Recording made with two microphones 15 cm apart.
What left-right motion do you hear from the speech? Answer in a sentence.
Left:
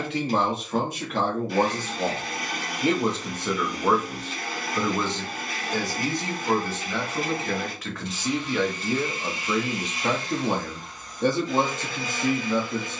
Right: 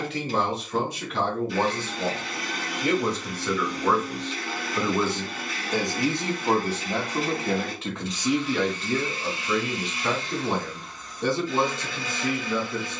In this clip you hear the speech go right and come back.